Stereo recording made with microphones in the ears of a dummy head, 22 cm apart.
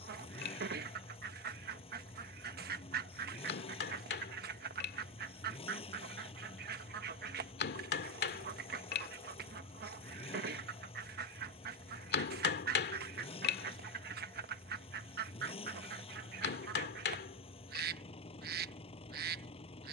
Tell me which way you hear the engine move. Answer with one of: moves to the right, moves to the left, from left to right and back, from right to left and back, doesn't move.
doesn't move.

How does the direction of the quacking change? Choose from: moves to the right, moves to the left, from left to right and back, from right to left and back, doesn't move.
doesn't move.